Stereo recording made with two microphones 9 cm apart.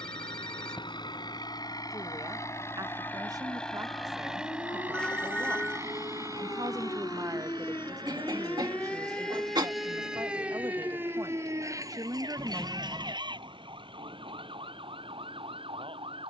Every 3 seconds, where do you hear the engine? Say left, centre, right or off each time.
left, centre, right, right, right, right.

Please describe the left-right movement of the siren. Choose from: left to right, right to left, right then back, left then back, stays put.
left to right.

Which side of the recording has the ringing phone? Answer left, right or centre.
centre.